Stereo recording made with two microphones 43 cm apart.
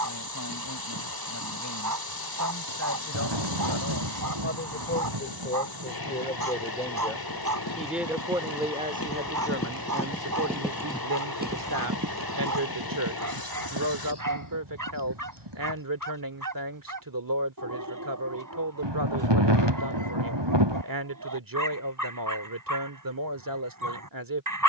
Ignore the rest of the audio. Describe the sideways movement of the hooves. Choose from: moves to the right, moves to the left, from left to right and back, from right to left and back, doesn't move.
moves to the right.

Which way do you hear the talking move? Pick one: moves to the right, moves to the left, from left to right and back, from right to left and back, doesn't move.
moves to the right.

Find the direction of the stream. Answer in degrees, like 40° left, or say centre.
60° left.